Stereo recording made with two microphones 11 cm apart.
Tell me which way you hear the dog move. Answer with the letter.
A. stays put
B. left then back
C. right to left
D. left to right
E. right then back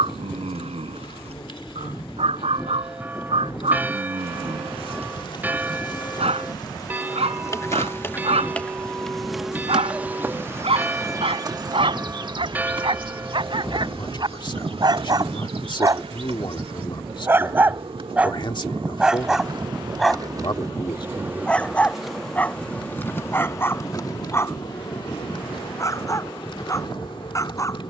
C.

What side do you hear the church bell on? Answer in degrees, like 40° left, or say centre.
20° right.